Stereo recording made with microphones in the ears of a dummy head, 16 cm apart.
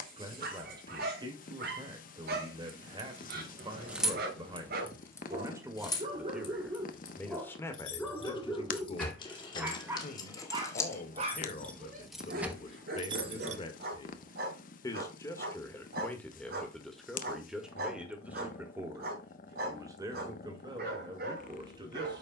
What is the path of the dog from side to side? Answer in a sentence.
In this clip you hear the dog go left and come back.